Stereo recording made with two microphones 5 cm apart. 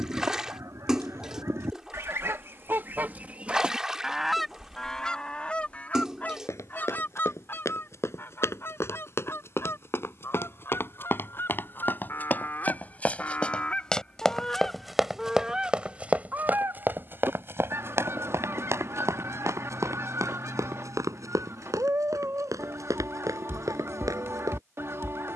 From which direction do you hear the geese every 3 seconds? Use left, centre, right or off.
right, centre, left, left, left, right, right, right, right.